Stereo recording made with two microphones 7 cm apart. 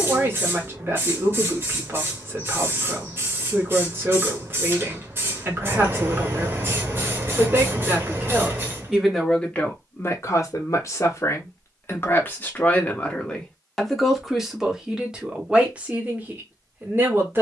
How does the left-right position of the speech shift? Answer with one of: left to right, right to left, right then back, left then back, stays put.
left then back.